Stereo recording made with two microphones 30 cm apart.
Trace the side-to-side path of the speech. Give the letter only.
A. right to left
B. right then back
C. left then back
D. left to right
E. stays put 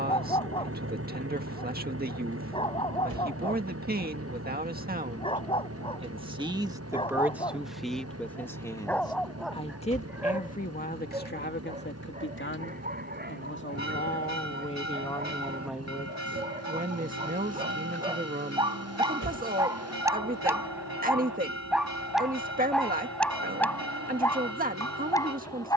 C.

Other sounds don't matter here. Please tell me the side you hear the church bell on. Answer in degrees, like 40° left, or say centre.
60° left.